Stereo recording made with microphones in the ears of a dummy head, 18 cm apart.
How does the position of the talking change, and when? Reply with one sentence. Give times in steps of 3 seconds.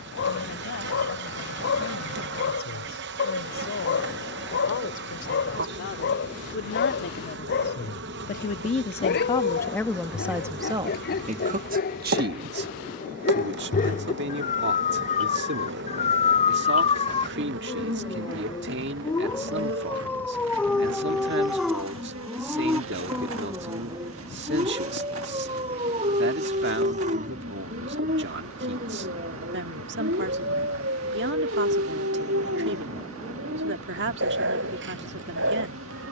You can hear the talking on the left from 0 s, in the centre from 9 s and on the right from 12 s.